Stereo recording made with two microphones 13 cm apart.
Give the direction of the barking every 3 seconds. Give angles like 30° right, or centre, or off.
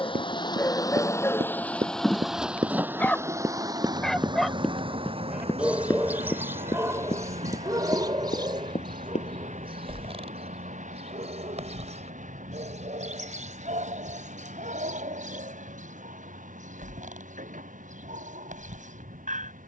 20° left, centre, 20° right, 50° right, 60° right, 70° right, 70° right.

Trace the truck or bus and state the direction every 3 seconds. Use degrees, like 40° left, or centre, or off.
10° left, 40° right, 60° right, 60° right, 70° right, 70° right, 70° right.